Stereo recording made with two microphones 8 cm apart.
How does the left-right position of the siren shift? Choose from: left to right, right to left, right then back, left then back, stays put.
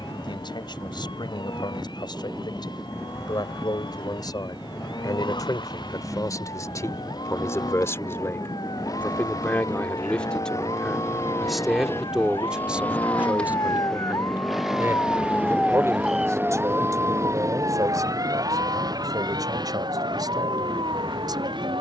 left to right.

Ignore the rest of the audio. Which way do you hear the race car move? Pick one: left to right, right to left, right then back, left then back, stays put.
left to right.